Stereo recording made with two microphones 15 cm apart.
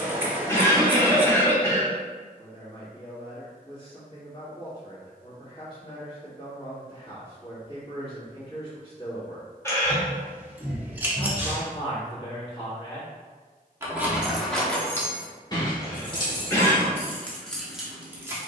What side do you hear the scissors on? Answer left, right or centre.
centre.